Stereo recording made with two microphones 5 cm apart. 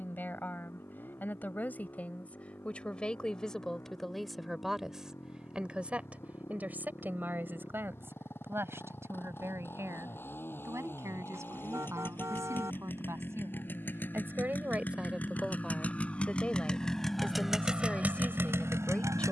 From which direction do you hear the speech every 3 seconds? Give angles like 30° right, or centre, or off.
30° left, centre, 40° right, 60° right, 50° right, 10° left, 20° left.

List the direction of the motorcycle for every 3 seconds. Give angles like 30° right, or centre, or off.
50° left, 50° left, 50° left, 40° left, 40° left, 10° left, 60° right.